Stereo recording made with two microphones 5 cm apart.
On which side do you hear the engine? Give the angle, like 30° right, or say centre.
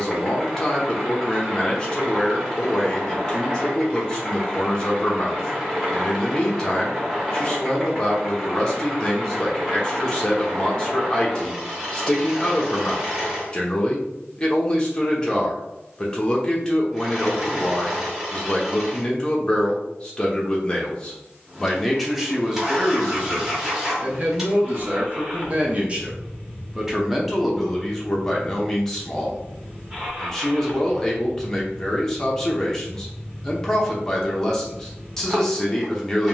10° right.